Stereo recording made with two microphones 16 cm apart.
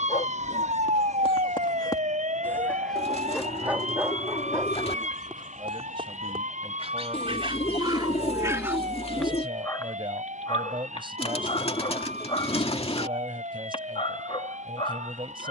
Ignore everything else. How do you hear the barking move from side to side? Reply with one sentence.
You can hear the barking go right and come back.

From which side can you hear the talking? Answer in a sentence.
You can hear the talking on the right.